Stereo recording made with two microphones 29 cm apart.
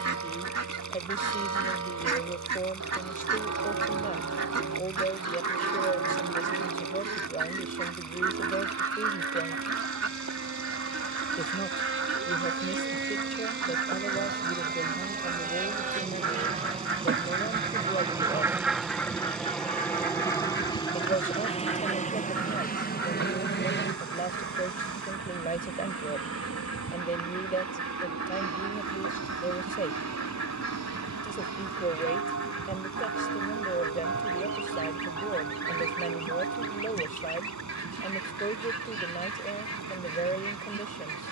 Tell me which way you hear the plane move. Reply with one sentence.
In this clip you hear the plane move from right to left.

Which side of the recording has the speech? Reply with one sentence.
In this clip you hear the speech on the left.